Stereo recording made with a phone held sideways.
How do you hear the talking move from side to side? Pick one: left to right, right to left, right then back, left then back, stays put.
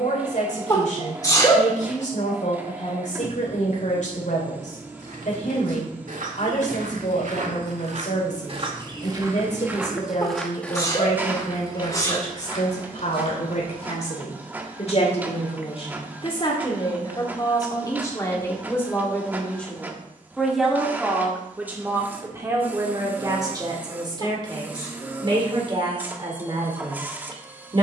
left to right.